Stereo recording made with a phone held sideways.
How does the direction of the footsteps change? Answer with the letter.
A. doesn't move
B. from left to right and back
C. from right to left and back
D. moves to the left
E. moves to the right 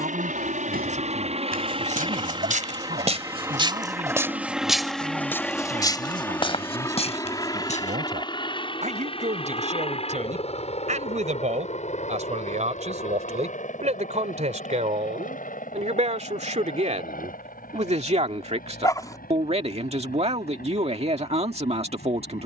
D.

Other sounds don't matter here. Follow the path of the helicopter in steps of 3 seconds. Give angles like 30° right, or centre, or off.
40° right, centre, 20° left, 40° left, 50° left, 50° left, 50° left, 60° left.